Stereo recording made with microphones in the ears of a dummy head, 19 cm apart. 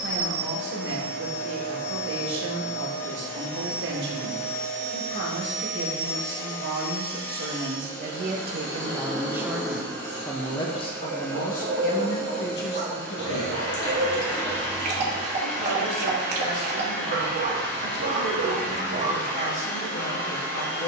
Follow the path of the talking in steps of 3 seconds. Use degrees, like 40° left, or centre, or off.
50° right, 50° right, 40° right, 10° left, 50° left, 70° left, 70° left.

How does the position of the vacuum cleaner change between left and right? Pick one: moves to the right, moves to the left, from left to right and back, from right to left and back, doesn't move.
doesn't move.